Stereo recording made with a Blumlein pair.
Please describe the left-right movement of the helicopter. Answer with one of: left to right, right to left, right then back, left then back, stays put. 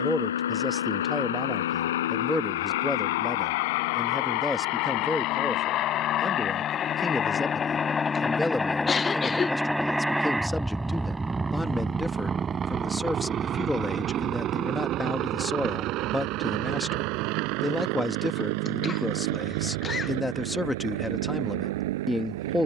left to right.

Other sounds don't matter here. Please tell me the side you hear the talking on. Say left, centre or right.
centre.